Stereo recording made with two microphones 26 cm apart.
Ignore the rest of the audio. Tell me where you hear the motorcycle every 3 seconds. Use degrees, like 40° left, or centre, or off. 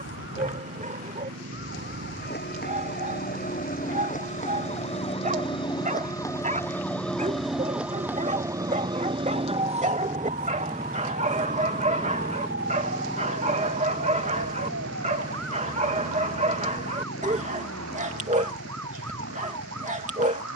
60° right, 50° right, 30° right, 10° right, 20° left, 40° left, 50° left.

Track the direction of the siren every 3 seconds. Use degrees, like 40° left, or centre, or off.
40° left, 30° left, centre, 30° right, 50° right, 60° right, 70° right.